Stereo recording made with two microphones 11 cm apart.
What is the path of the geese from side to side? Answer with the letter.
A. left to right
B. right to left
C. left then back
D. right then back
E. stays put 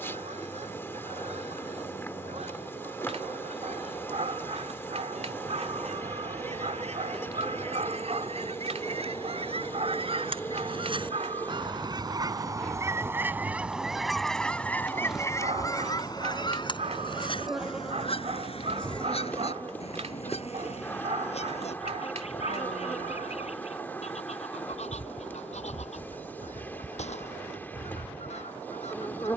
B.